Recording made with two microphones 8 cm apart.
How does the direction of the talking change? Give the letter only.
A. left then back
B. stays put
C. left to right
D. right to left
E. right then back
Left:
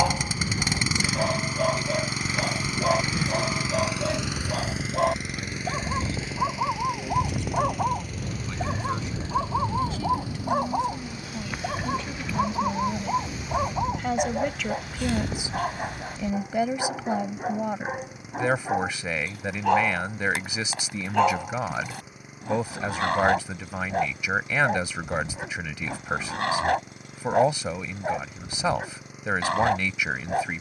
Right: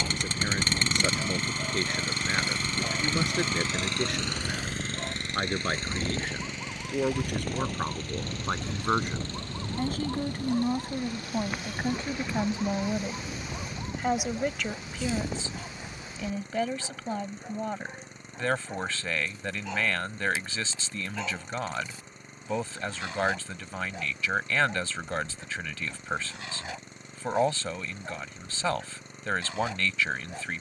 D.